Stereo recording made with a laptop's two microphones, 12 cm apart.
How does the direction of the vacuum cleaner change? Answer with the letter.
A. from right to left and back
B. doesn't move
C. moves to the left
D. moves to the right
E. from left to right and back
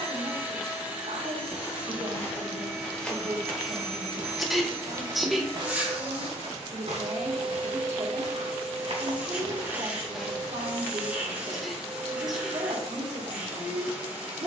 B.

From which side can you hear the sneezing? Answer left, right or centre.
centre.